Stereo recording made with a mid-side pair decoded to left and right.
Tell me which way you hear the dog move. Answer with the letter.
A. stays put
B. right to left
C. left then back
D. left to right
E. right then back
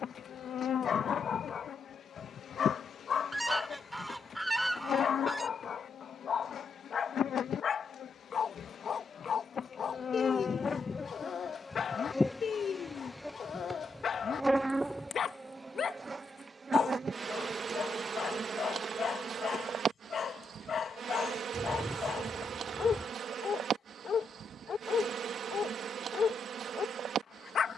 A.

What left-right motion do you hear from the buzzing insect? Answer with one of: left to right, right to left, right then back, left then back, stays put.
left to right.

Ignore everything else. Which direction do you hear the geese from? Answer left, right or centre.
centre.